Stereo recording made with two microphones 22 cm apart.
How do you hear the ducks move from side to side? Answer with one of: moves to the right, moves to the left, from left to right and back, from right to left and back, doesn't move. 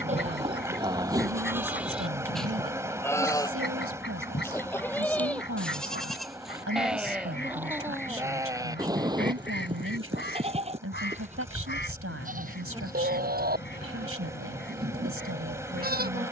doesn't move.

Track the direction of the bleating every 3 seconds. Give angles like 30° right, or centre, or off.
10° right, 10° left, 10° right, 30° right, 40° right, 40° right.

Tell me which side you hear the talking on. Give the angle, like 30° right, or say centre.
70° right.